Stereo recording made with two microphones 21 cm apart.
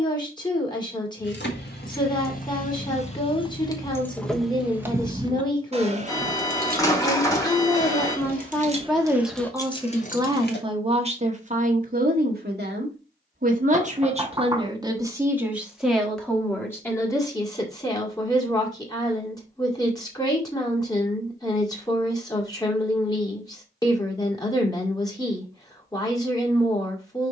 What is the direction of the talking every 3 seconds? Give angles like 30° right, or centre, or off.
20° left, 20° left, 10° left, 20° right, 30° right, 10° left, 20° left, 20° left, 20° left.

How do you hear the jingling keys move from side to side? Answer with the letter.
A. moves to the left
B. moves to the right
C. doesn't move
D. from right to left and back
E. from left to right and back
E.